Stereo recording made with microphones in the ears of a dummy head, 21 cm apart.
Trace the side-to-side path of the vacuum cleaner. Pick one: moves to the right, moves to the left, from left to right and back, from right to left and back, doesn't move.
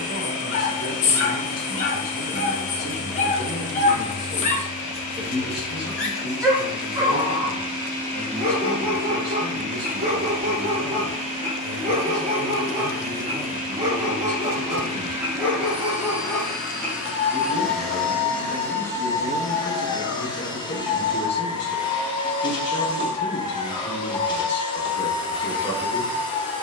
from left to right and back.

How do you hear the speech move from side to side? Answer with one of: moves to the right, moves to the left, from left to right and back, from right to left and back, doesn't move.
from left to right and back.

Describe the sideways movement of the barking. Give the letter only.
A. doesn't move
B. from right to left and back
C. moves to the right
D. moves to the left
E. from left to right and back
E.